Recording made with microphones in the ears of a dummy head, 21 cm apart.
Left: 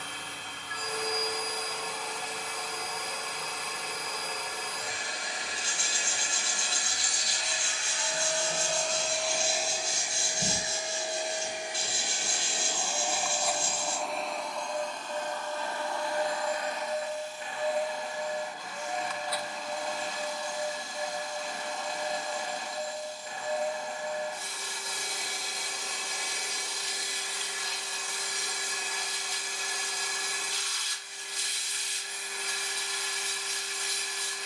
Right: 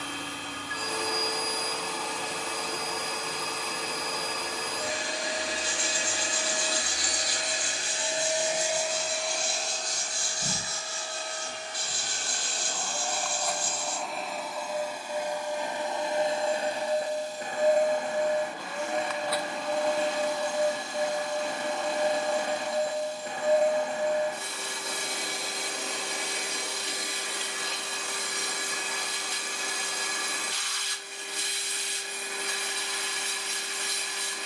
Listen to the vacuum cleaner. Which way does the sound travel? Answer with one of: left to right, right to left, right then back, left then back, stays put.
left then back.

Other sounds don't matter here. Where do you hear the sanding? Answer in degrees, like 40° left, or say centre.
30° left.